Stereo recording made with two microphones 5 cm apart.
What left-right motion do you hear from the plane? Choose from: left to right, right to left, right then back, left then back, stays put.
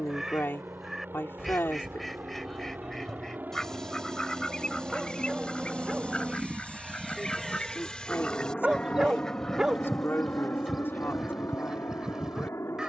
right to left.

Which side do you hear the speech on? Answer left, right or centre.
left.